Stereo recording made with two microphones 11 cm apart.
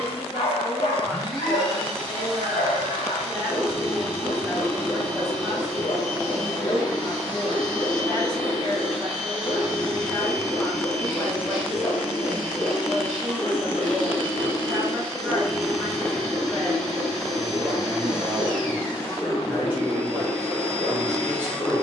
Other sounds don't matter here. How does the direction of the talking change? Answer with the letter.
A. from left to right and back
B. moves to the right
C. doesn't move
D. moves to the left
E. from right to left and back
C.